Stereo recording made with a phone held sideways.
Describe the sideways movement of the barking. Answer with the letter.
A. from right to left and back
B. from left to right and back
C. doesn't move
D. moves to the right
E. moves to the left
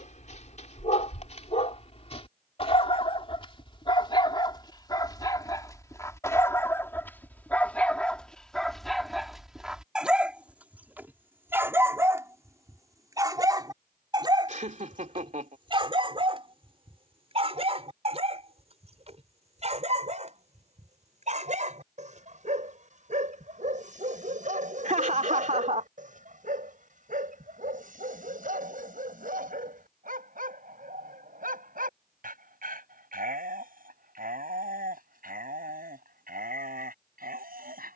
D.